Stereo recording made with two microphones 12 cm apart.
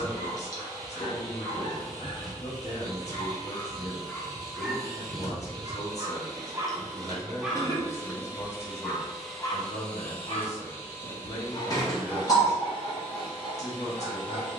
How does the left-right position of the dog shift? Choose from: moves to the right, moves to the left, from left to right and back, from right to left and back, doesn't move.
from left to right and back.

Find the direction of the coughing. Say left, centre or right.
left.